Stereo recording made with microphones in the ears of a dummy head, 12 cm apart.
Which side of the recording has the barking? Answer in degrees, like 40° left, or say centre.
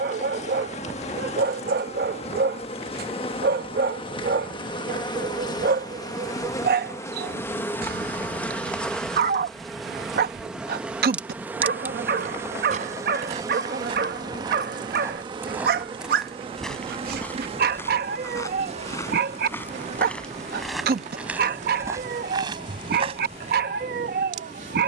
80° right.